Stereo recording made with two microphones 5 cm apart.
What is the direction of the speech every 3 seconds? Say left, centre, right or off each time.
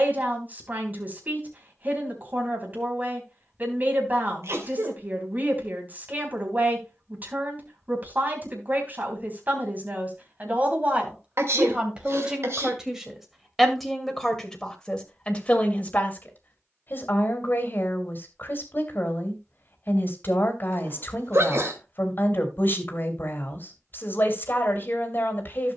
right, right, right, right, centre, left, left, left, left.